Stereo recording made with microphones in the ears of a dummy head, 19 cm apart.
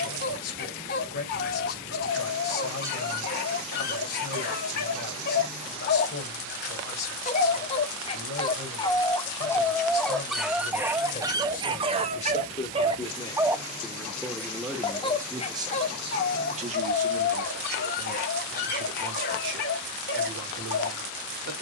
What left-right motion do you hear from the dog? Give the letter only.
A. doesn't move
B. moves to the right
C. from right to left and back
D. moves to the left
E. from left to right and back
E.